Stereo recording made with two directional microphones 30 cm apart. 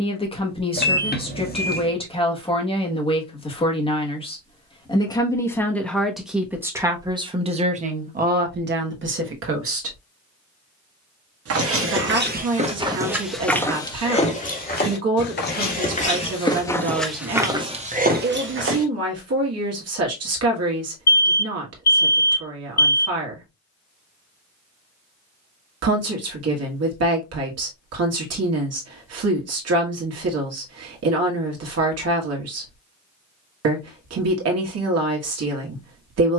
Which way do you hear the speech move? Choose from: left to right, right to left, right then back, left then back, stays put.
left to right.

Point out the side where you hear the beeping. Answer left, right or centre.
left.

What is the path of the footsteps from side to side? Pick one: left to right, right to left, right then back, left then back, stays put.
left then back.